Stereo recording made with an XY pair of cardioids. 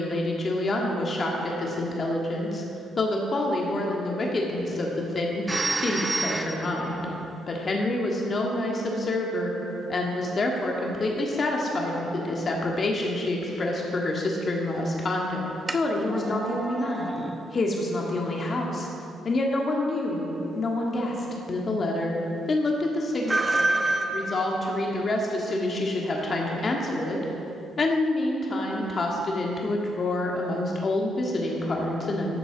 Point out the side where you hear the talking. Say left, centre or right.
left.